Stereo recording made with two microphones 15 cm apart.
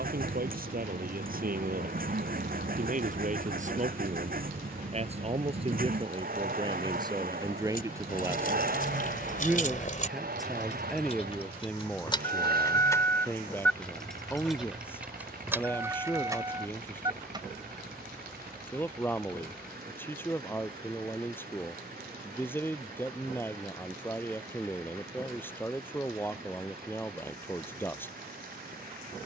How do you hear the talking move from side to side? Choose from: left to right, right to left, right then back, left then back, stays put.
right to left.